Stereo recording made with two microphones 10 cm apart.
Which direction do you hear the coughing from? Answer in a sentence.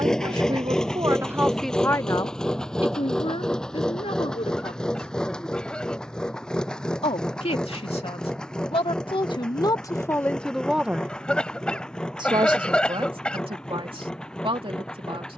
You can hear the coughing in the centre.